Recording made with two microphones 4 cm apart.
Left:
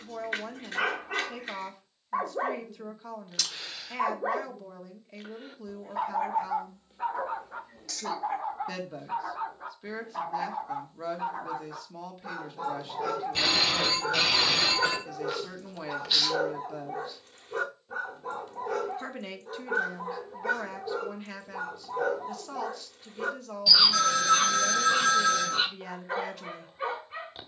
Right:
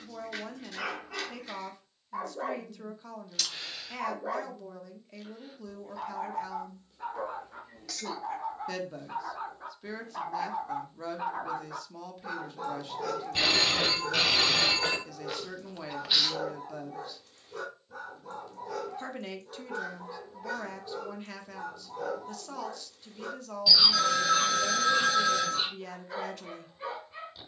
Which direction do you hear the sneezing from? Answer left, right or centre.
centre.